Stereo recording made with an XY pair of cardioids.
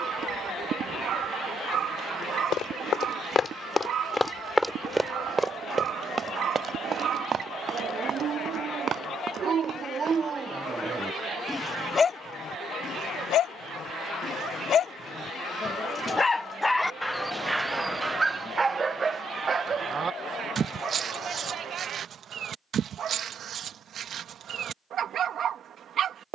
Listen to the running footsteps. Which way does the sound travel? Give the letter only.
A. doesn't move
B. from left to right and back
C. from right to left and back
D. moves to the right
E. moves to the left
D.